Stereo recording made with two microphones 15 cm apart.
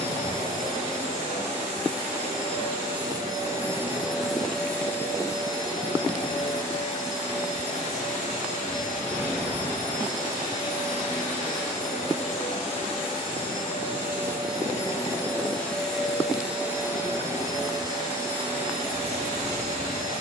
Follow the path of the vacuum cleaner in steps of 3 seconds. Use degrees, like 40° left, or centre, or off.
50° right, centre, 50° left, 60° left, 40° left, 10° right, 40° right.